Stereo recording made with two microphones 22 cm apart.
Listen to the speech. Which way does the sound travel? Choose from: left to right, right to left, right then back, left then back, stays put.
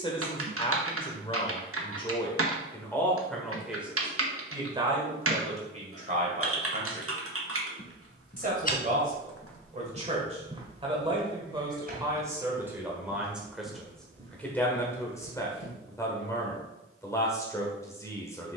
right then back.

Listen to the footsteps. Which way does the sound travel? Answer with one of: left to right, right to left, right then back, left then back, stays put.
left to right.